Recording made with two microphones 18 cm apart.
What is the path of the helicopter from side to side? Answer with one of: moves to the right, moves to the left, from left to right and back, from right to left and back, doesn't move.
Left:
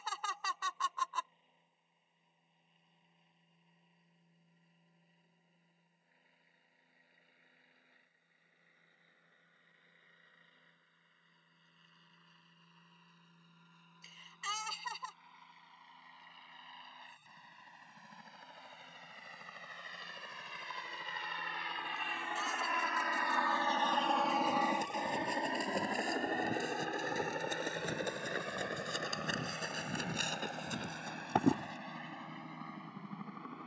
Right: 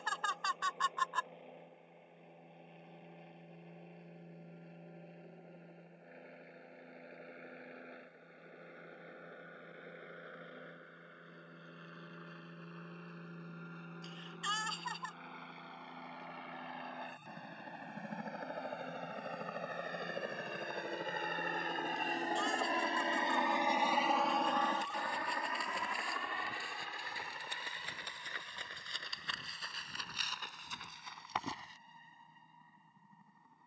moves to the left.